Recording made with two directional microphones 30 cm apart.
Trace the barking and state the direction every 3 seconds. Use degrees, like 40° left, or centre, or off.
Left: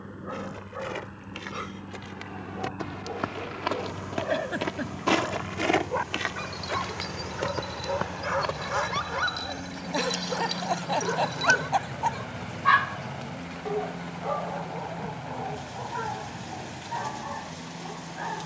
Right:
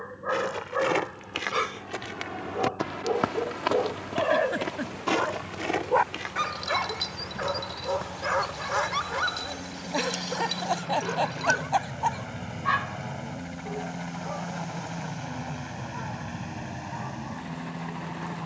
60° right, 60° right, 20° right, 10° left, 40° left, 50° left.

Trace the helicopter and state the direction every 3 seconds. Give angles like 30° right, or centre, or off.
50° left, 40° left, 30° left, 10° left, 20° right, 40° right.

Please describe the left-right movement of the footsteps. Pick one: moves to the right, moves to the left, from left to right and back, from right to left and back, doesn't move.
moves to the left.